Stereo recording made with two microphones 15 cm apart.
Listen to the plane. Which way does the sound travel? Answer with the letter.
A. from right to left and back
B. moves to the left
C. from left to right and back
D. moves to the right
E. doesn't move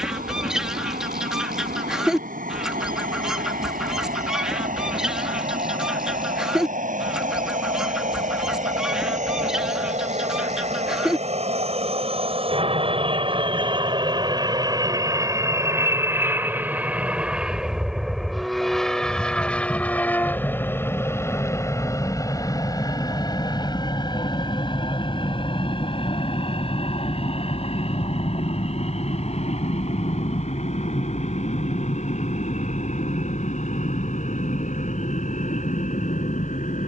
B.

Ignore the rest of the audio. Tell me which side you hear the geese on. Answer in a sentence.
You can hear the geese in the centre.